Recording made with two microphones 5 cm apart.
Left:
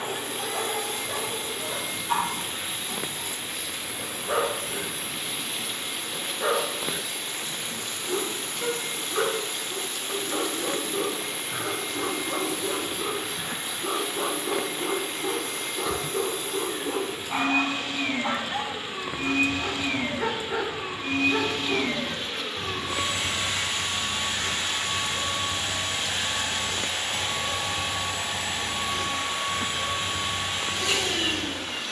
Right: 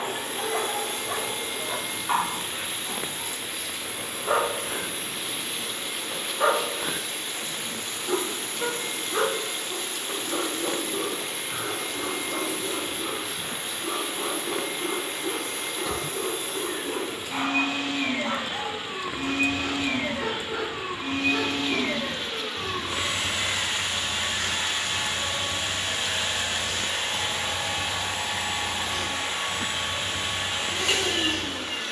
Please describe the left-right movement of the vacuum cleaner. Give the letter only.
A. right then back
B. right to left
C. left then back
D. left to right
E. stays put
E.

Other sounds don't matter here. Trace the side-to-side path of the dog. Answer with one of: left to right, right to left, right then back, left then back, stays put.
right to left.